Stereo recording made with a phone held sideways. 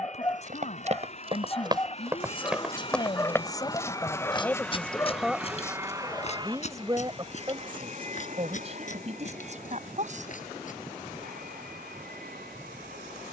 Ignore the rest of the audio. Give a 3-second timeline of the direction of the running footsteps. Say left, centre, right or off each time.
right, left, left, left, off.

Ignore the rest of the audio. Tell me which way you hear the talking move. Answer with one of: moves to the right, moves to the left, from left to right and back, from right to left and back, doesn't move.
moves to the right.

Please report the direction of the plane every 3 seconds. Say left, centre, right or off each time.
left, centre, right, right, right.